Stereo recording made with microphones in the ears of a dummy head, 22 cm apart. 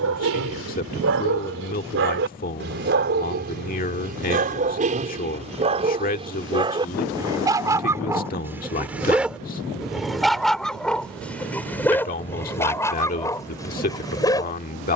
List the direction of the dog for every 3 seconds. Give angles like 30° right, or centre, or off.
50° right, 30° right, 10° right, centre, 10° left.